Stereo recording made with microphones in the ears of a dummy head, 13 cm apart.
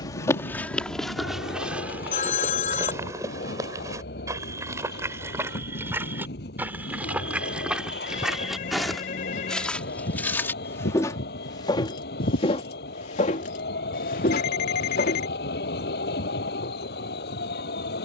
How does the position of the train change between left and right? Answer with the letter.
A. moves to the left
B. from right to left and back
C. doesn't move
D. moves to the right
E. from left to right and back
C.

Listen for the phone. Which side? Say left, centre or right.
left.